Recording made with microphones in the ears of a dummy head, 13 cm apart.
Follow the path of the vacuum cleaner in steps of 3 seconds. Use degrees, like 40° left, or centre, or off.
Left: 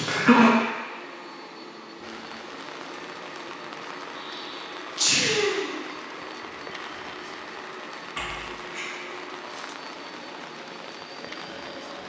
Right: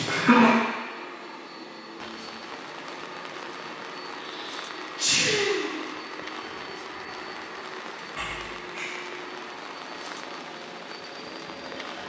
30° left, centre, 10° left, 40° left.